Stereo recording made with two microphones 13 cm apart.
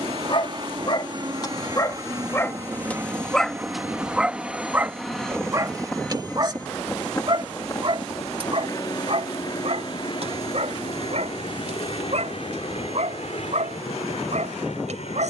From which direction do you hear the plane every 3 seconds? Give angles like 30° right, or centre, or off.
30° right, 10° right, 20° left, 40° left, 50° left.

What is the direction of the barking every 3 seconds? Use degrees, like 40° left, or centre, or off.
30° left, 10° right, 40° right, 60° right, 70° right.